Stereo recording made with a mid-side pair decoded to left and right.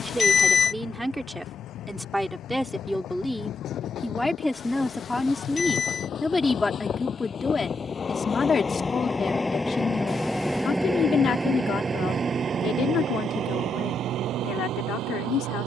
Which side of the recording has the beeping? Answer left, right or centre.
left.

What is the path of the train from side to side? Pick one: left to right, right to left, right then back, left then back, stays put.
left to right.